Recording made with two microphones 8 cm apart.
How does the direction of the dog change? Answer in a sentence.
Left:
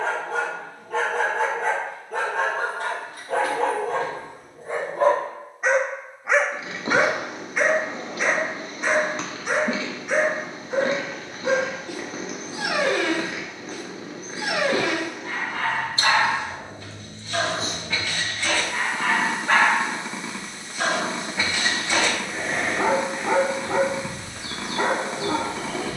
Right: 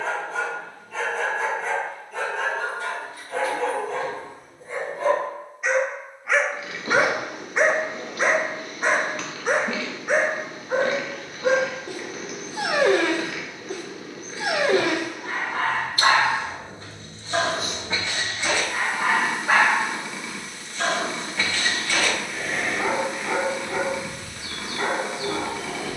You can hear the dog move from left to right and back again.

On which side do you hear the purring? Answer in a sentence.
You can hear the purring on the left.